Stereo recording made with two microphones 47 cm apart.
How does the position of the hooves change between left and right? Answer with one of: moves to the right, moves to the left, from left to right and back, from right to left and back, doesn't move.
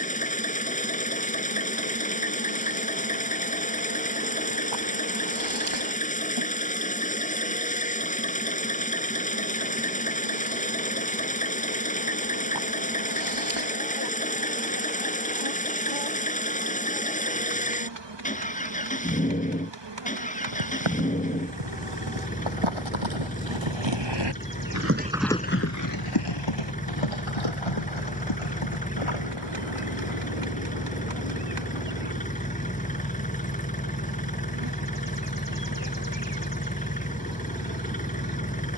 moves to the left.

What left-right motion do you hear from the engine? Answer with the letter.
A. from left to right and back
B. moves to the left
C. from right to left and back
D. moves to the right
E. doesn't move
E.